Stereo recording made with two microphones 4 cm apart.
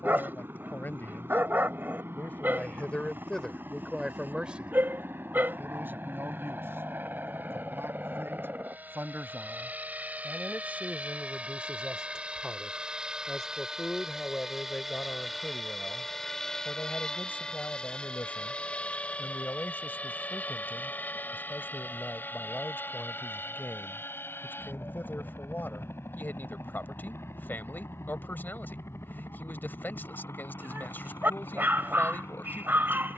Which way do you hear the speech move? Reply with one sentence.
In this clip you hear the speech go right and come back.